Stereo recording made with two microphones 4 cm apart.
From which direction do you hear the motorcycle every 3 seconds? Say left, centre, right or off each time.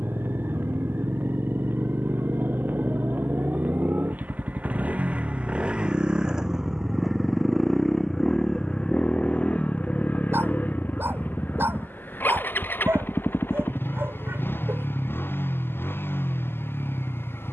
right, right, centre, left, left, left.